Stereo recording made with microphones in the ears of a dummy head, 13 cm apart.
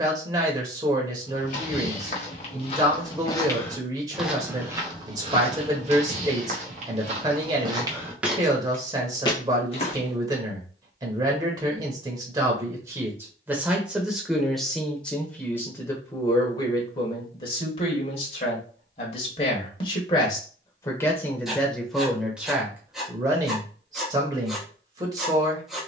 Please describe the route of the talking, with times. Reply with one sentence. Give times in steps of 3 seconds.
You can hear the talking on the right from 0 s, in the centre from 12 s, on the left from 15 s, in the centre from 21 s and on the right from 24 s.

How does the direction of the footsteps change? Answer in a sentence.
You can hear the footsteps move from left to right and back again.